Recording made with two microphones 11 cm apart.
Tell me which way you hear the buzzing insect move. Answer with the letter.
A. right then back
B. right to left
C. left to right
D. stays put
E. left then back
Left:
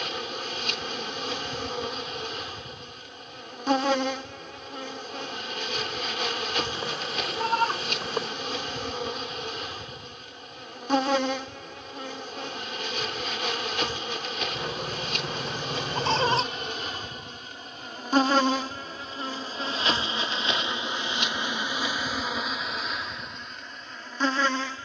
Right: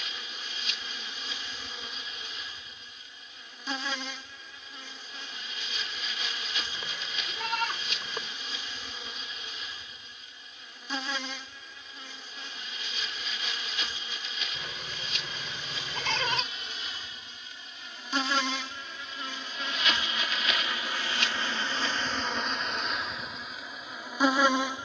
C.